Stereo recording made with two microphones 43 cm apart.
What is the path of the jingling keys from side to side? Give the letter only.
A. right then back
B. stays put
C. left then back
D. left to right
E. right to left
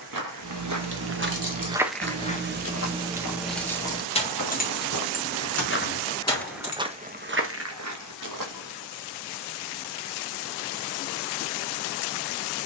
E.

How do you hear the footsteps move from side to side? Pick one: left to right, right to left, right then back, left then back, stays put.
left then back.